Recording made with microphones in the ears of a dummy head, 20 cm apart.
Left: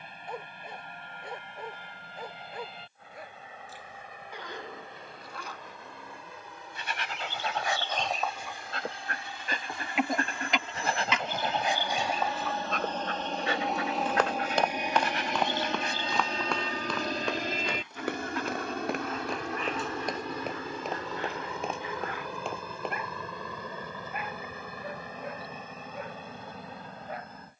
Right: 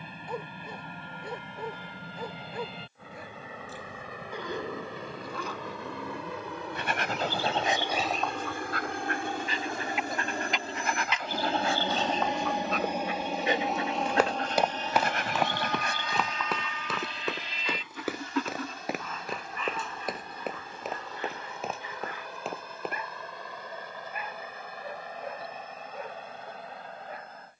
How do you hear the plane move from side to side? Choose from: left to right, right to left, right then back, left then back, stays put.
right to left.